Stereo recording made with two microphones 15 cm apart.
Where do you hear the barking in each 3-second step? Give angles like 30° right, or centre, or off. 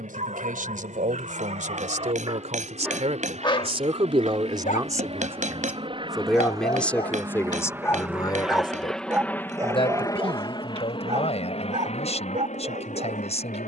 50° right, 50° left, 30° left, 30° right, 50° right.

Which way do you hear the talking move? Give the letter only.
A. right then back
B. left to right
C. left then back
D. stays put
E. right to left
E.